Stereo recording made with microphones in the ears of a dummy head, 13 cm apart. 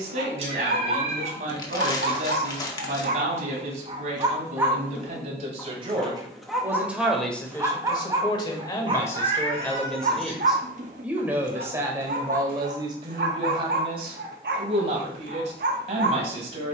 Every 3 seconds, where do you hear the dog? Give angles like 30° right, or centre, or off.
70° right, 20° right, 10° right, 50° right, 60° right, 60° right.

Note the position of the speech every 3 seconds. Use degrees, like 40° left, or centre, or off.
50° right, 50° right, 10° left, centre, 30° right, 50° right.